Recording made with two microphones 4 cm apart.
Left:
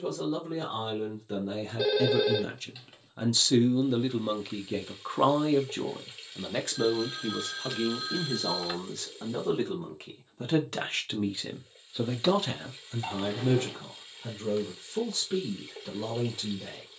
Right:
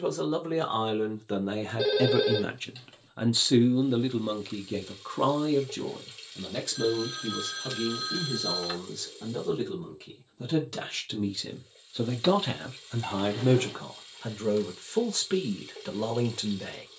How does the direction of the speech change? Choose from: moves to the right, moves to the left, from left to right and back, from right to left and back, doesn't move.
from right to left and back.